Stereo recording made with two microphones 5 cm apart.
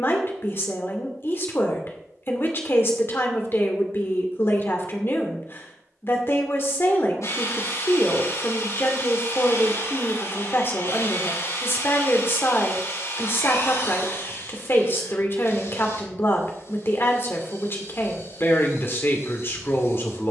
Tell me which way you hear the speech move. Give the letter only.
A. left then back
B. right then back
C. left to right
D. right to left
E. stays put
E.